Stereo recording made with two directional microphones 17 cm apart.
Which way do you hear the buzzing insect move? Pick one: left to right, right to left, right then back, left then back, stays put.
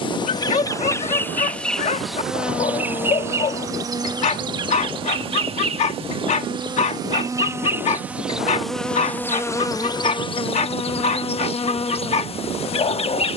right then back.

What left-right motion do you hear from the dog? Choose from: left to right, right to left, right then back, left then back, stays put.
stays put.